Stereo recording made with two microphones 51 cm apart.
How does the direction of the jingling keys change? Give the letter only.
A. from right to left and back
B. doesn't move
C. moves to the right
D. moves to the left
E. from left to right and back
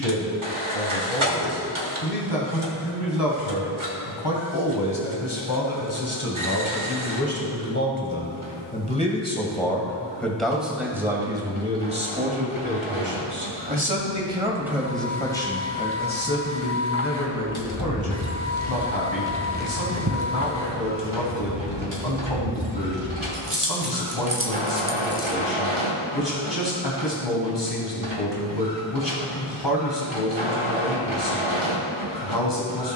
E.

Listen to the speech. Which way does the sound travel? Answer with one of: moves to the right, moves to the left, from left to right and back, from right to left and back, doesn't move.
from left to right and back.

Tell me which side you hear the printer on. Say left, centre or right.
right.